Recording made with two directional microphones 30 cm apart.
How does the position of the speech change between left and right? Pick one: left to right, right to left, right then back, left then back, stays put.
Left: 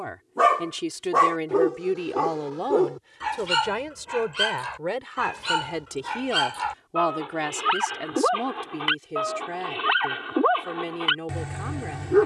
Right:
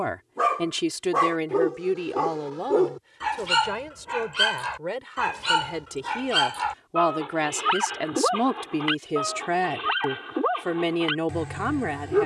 left then back.